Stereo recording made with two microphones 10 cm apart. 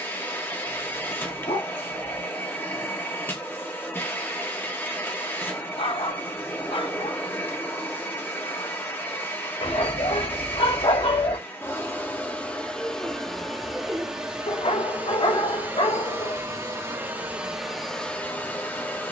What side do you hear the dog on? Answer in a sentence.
You can hear the dog on the left.